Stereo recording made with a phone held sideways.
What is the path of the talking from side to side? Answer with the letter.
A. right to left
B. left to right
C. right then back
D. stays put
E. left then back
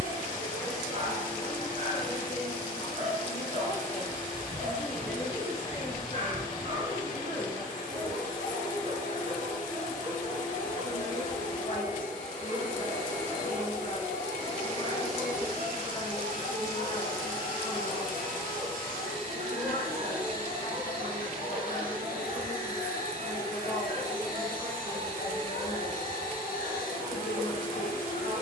C.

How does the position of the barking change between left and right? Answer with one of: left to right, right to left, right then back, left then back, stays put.
stays put.